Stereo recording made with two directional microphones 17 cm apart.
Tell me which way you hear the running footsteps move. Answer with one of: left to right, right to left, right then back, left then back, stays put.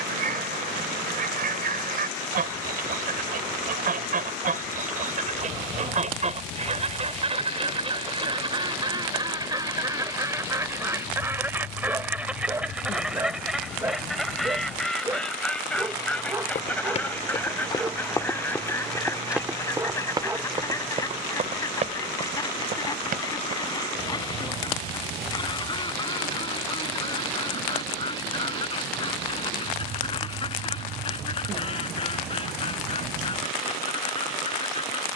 left to right.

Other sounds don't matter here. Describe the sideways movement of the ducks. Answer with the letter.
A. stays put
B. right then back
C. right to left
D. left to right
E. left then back
C.